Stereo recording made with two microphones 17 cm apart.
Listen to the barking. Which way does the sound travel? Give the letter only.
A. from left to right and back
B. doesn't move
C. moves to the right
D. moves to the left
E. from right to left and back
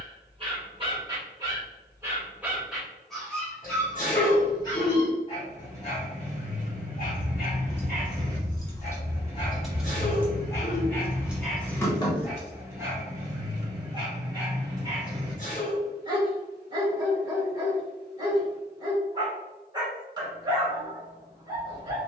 E.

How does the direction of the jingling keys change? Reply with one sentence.
You can hear the jingling keys move from left to right and back again.